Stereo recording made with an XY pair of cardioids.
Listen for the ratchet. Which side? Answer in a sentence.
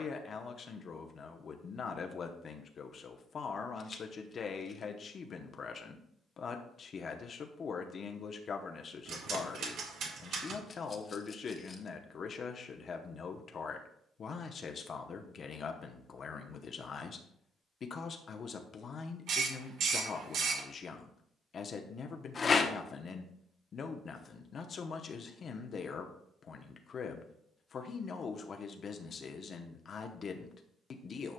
In this clip you hear the ratchet on the right.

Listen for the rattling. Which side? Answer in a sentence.
In this clip you hear the rattling on the left.